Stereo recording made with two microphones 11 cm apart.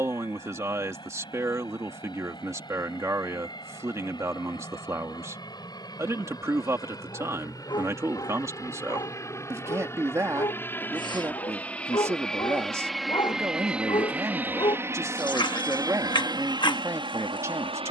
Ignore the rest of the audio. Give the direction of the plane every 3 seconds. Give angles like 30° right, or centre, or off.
50° left, 50° left, 40° left, 20° left, 10° right, 40° right.